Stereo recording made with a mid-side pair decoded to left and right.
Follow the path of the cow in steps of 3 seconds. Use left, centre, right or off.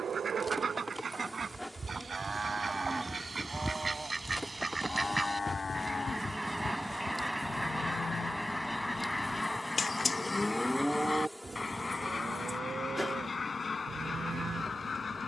right, centre, left, centre, right.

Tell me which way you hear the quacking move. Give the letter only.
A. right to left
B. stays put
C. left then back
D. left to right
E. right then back
A.